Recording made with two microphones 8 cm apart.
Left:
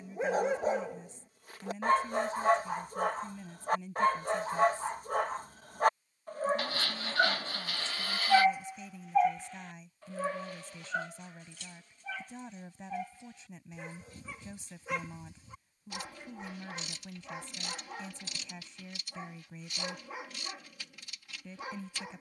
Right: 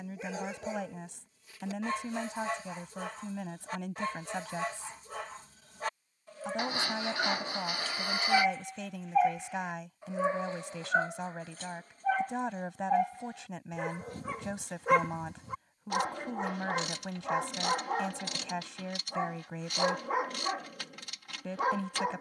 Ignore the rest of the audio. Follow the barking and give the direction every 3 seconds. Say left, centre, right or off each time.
left, left, left, right, right, right, right, right.